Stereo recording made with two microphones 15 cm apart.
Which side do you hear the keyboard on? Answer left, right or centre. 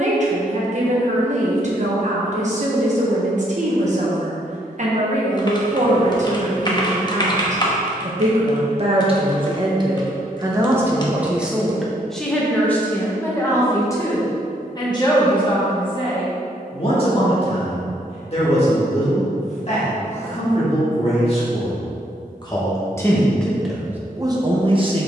left.